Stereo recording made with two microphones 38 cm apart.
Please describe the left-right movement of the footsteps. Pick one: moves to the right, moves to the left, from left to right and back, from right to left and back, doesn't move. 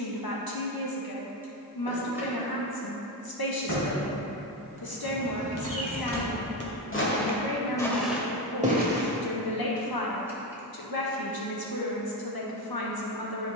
moves to the right.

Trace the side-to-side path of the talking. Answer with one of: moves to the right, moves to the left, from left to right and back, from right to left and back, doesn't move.
doesn't move.